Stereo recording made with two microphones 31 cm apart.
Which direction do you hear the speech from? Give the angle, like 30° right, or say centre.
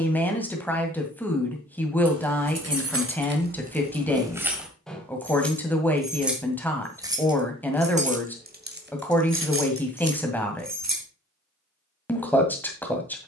10° left.